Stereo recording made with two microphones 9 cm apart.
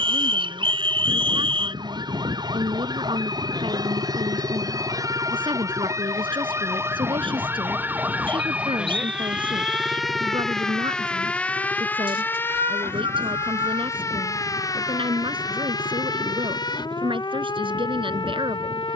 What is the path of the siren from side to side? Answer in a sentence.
In this clip you hear the siren move from right to left.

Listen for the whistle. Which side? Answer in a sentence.
In this clip you hear the whistle on the right.